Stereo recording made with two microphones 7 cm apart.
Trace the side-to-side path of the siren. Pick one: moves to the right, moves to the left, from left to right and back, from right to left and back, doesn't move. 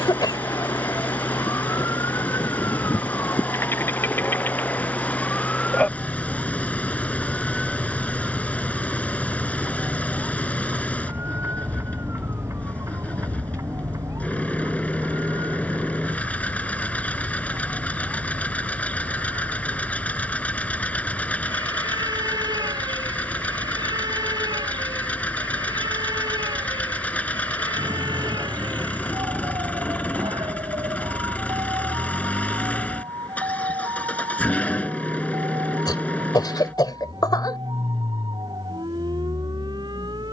moves to the right.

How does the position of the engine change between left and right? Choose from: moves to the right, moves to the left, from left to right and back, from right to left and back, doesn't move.
doesn't move.